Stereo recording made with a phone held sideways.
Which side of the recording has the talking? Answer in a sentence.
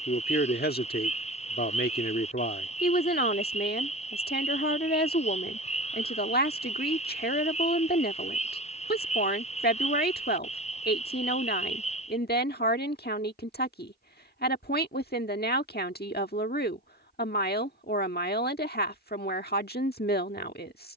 You can hear the talking on the left.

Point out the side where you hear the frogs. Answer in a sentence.
In this clip you hear the frogs on the left.